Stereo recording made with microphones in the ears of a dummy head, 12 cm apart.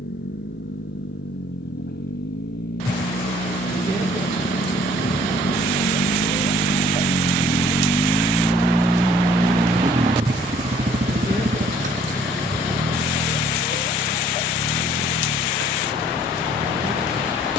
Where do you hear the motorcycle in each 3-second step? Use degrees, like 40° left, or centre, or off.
80° left, 70° left, 30° left, 40° right, 70° right, 80° right.